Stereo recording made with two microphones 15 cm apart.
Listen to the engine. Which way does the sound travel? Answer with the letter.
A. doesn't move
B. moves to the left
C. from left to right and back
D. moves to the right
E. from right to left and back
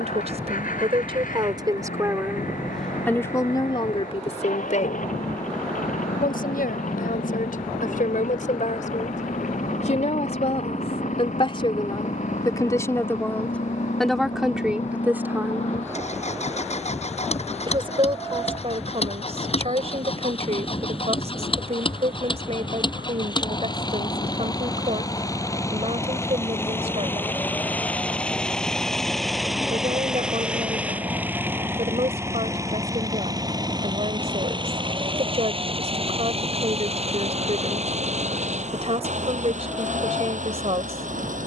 D.